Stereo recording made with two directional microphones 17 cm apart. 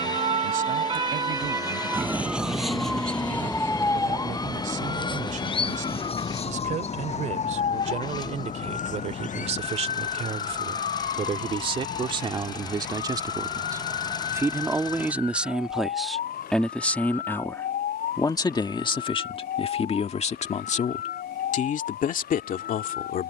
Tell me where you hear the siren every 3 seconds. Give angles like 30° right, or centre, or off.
20° right, 20° left, 40° left, 50° left, 60° left, 60° left, 60° left, 60° left.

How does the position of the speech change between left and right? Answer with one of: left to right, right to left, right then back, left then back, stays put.
right to left.